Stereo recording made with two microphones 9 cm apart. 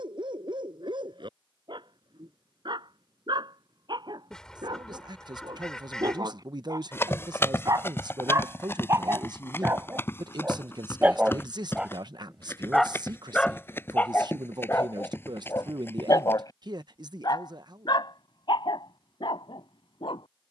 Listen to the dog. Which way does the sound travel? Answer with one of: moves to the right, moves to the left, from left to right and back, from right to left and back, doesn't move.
moves to the left.